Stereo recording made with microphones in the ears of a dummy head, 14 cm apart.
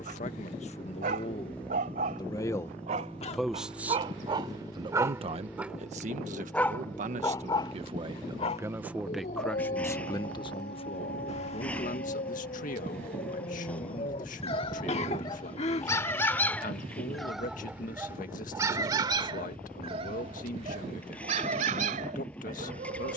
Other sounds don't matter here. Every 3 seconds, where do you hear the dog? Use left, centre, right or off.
right, right, left, left, left, centre, right, right.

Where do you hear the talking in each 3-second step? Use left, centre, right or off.
left, right, right, left, left, left, left, left.